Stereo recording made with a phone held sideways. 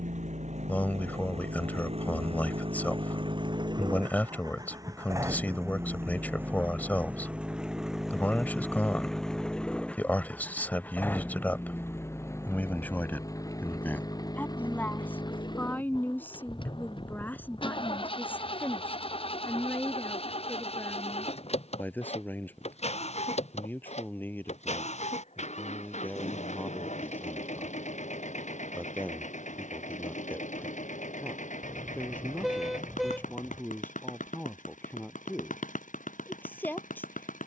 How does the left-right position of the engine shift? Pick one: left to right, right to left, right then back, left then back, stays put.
right to left.